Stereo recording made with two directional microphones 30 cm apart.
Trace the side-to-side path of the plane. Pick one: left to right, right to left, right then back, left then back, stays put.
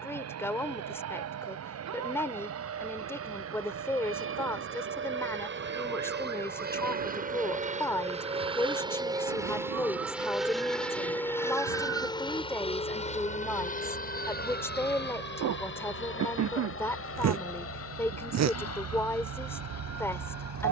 right to left.